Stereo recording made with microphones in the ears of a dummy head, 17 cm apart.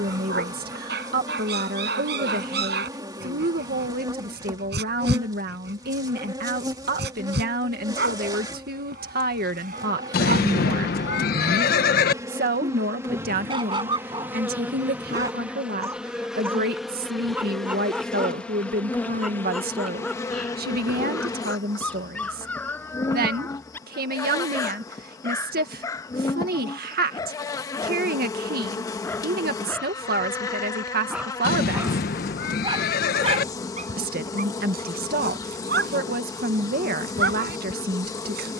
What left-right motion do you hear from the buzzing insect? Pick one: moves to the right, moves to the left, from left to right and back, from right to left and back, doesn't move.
moves to the left.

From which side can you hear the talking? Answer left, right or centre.
right.